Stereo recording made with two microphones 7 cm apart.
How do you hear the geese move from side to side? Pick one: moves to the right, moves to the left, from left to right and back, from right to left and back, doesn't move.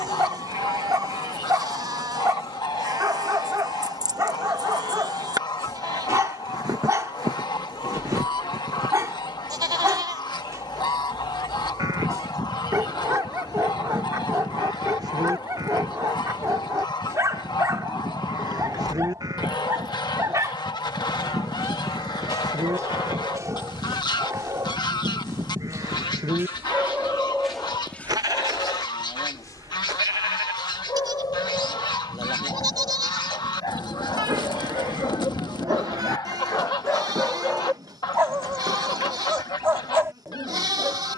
doesn't move.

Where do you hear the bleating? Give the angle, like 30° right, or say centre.
60° right.